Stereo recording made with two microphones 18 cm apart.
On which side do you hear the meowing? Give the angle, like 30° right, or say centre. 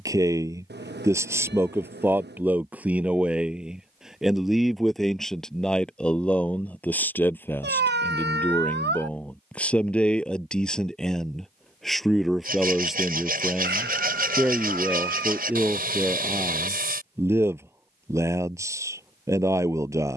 70° right.